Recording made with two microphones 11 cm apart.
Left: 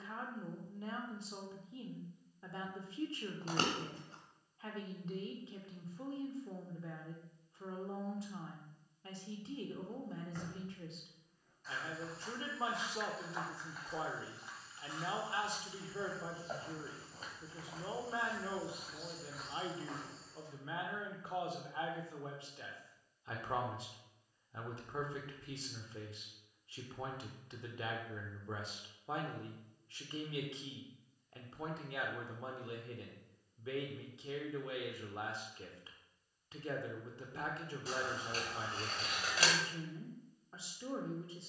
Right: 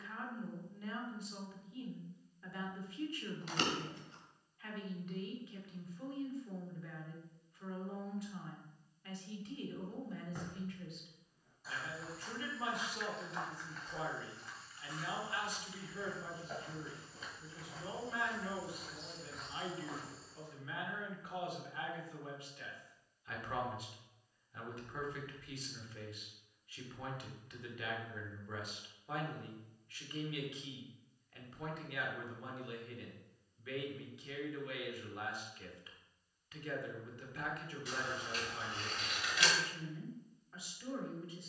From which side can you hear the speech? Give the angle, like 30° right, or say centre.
30° left.